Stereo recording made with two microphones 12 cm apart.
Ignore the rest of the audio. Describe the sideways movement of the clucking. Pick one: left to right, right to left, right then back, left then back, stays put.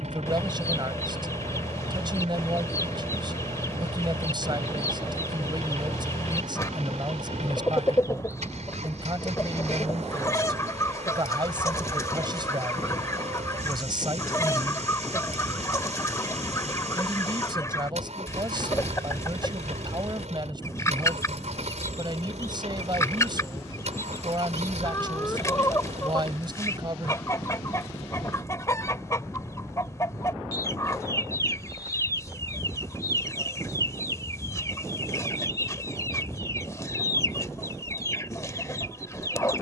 stays put.